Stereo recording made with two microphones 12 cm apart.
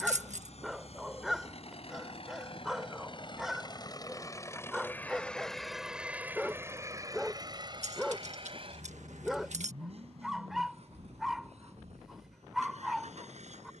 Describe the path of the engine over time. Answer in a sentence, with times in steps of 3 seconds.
You can hear the engine on the left from 0 s and on the right from 6 s.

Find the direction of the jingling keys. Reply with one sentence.
In this clip you hear the jingling keys on the right.